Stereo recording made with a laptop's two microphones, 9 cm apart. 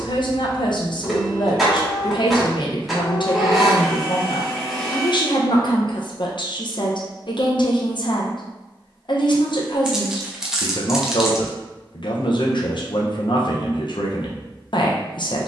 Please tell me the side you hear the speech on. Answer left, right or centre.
left.